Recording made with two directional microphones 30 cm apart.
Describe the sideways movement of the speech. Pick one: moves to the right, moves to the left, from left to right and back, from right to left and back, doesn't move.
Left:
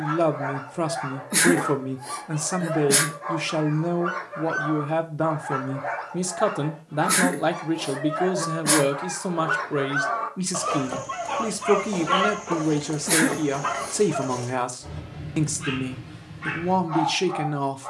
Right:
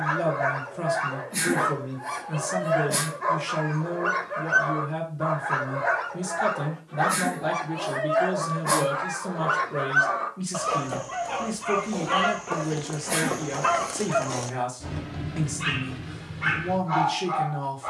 doesn't move.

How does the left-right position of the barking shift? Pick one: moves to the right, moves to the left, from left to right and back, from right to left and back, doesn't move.
from right to left and back.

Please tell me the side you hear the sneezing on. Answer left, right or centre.
left.